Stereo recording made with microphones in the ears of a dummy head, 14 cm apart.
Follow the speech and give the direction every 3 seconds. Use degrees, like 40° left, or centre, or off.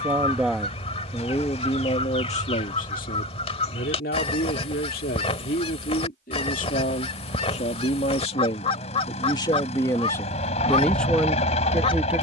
20° left, 60° left, 40° left, 10° left.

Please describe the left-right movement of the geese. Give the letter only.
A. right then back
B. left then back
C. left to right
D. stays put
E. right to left
D.